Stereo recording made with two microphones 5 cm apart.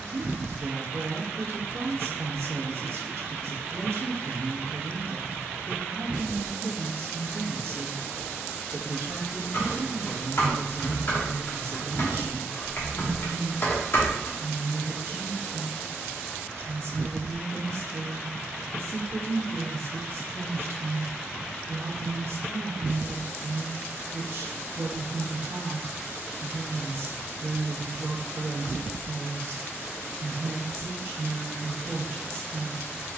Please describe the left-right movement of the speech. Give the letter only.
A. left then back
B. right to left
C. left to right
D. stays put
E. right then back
D.